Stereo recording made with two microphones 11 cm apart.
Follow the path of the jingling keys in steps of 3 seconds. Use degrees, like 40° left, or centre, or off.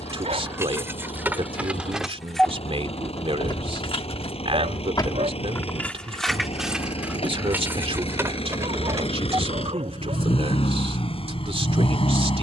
10° right, 40° left, 10° right, off.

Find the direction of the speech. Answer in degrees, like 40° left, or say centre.
60° right.